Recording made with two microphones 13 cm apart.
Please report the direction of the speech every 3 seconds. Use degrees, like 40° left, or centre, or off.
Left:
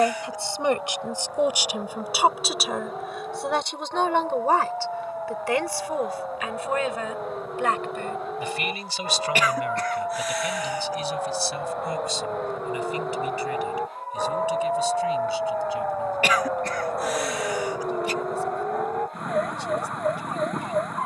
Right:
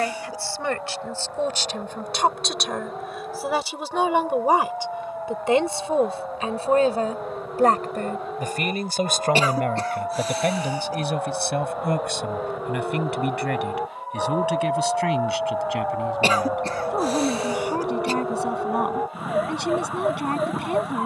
10° left, 10° right, 40° right, 60° right, 70° right, 70° right, 80° right.